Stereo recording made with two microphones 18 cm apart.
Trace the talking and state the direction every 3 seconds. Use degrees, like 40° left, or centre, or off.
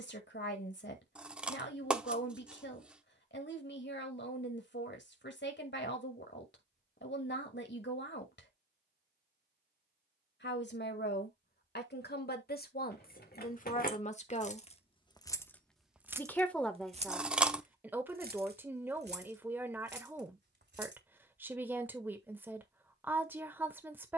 70° left, 70° left, 70° left, 70° left, 50° left, centre, 10° right, 10° right.